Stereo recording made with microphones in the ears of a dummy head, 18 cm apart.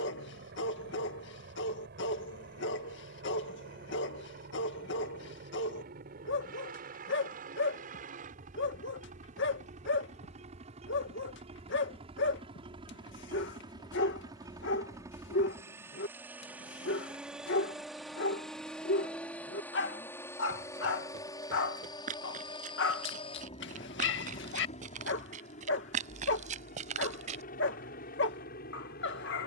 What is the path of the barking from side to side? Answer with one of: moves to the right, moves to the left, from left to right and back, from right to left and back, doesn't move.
doesn't move.